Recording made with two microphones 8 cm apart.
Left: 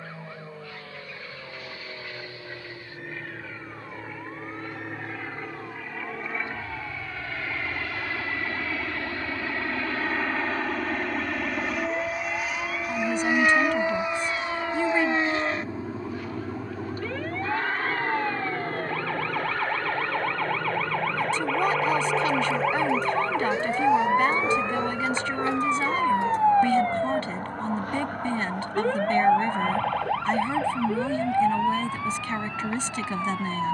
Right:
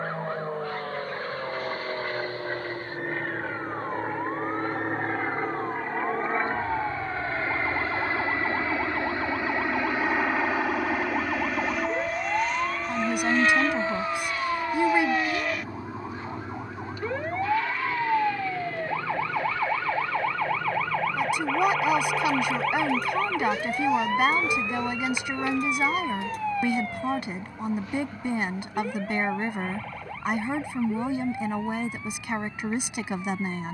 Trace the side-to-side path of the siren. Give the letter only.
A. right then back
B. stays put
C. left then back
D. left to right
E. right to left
E.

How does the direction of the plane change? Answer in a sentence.
You can hear the plane move to the left.